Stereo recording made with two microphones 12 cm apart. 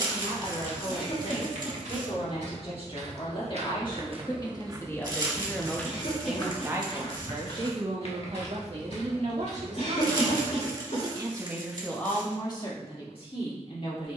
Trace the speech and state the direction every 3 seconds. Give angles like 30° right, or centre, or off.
50° left, 30° left, 40° right, 50° right, 40° left.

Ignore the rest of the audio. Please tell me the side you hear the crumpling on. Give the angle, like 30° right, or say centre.
40° right.